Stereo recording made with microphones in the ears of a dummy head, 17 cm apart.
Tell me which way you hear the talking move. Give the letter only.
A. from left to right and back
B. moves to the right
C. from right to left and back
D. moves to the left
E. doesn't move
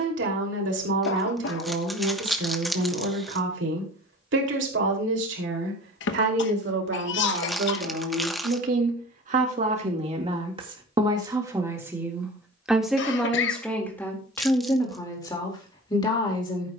D.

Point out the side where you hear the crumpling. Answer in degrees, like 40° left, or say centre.
centre.